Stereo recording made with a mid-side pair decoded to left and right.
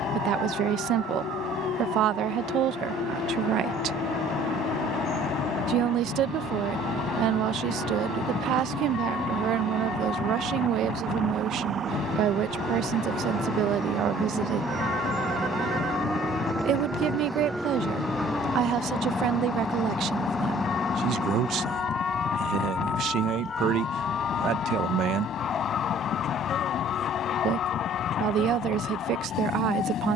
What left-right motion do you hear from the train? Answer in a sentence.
You can hear the train stay put.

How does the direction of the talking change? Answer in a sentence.
In this clip you hear the talking stay put.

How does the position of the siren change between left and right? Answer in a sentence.
You can hear the siren travel towards the left.